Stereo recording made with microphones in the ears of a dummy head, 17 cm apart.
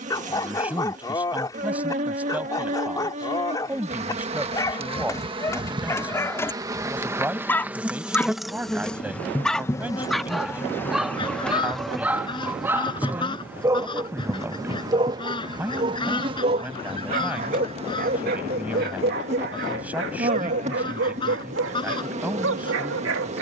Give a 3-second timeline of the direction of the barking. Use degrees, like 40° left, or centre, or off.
20° left, 20° left, 10° left, centre, 10° right, 40° right, 60° right, 70° right.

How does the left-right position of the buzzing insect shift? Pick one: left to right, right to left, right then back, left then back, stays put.
left then back.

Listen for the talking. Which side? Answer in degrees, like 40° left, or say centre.
10° right.